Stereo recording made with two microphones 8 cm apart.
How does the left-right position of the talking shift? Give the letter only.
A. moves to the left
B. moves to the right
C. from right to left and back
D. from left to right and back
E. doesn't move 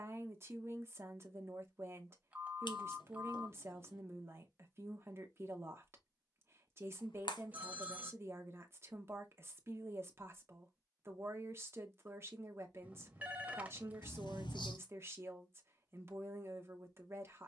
E.